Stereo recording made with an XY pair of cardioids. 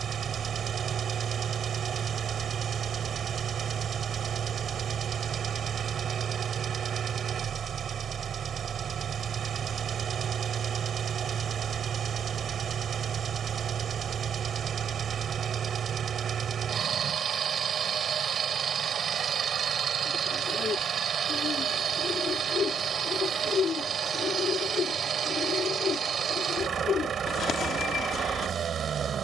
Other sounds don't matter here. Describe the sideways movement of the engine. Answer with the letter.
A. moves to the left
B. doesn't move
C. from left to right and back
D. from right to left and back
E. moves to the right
B.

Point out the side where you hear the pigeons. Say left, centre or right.
left.